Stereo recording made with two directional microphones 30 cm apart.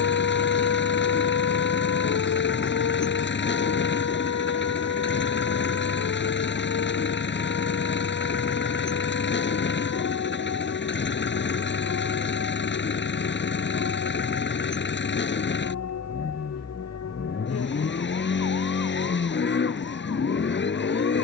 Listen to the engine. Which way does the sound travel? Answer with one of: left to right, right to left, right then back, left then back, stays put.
stays put.